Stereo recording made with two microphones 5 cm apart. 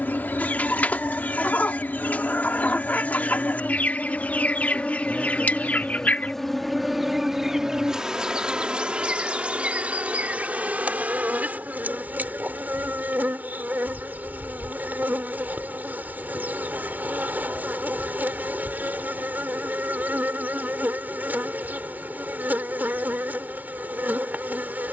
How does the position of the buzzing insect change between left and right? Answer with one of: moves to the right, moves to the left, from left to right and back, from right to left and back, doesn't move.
moves to the right.